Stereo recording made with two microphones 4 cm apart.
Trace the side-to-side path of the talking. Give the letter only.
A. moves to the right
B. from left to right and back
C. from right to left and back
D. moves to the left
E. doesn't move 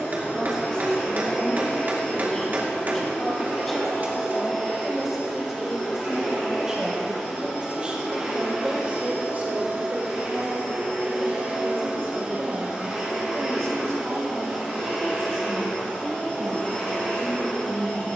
A.